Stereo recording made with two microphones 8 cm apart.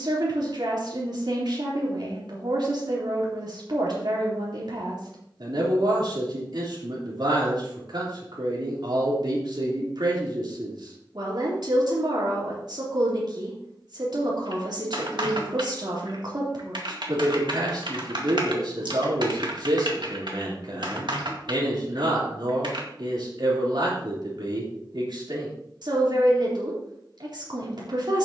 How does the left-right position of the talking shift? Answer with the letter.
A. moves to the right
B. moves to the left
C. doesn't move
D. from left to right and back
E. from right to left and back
C.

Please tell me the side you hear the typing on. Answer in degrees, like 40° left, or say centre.
70° right.